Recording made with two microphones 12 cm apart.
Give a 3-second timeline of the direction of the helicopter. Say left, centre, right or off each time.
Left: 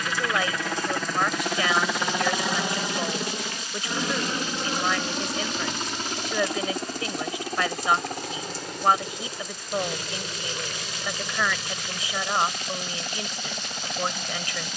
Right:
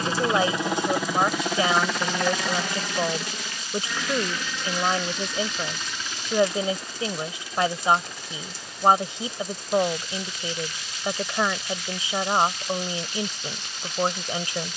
centre, left, left, left, left.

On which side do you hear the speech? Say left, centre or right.
right.